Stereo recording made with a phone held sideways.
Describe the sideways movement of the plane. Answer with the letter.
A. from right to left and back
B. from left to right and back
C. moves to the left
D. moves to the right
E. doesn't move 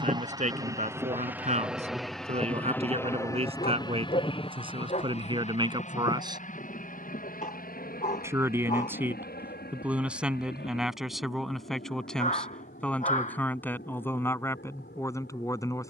C.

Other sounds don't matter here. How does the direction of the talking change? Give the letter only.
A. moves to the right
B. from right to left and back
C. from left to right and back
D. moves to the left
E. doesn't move
D.